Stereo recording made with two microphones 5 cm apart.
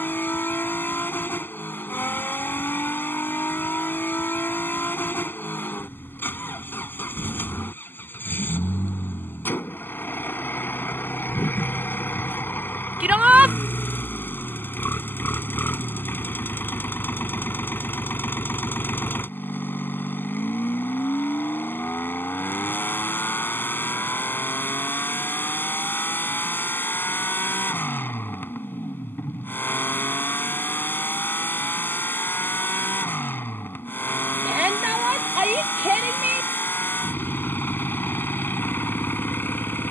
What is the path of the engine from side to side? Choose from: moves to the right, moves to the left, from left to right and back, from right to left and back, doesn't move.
doesn't move.